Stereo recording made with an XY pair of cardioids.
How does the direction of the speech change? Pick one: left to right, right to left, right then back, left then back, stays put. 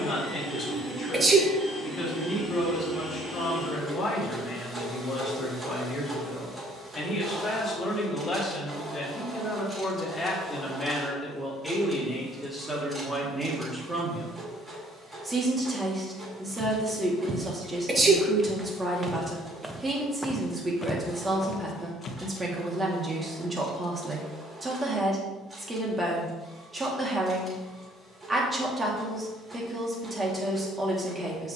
left to right.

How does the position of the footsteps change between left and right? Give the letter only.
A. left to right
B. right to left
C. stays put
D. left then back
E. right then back
B.